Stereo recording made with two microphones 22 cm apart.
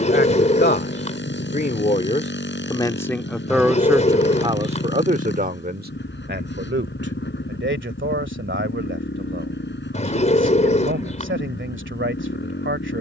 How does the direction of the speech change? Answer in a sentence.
You can hear the speech go from the left side to the right.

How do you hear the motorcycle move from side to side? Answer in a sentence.
In this clip you hear the motorcycle stay in one place.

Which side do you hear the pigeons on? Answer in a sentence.
You can hear the pigeons on the left.